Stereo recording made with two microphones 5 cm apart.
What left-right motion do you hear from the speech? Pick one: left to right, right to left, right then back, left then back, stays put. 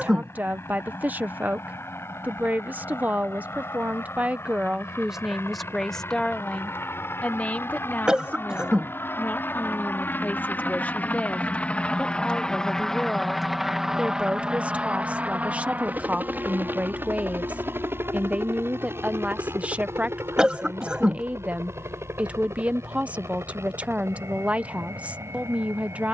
left then back.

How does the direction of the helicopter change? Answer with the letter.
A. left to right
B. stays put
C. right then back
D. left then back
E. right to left
A.